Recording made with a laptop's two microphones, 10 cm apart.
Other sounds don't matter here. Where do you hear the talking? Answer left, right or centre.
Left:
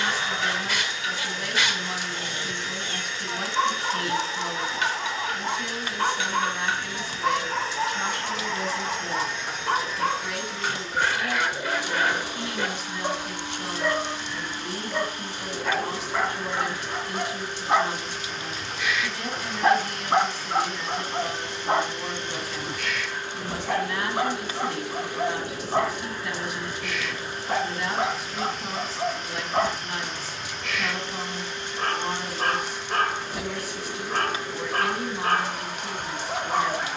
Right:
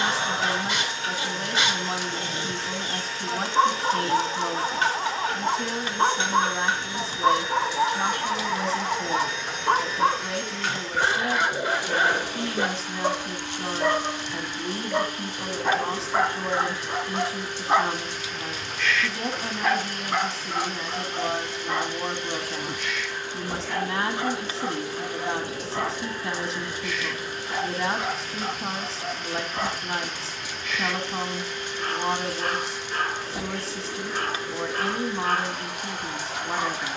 right.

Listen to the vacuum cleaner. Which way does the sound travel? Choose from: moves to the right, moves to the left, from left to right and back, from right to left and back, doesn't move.
moves to the left.